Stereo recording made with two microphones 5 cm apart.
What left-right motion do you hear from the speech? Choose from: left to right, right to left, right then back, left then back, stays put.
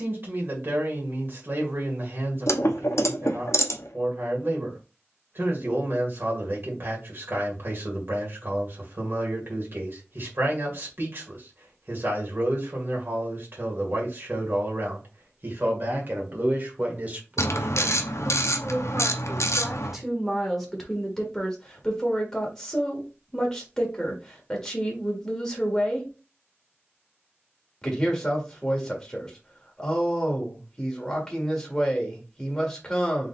right to left.